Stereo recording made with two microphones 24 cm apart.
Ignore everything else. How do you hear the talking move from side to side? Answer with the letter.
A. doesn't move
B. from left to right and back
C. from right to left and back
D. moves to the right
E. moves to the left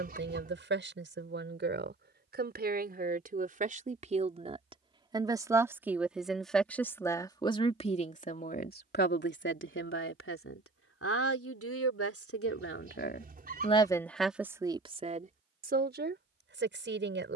C.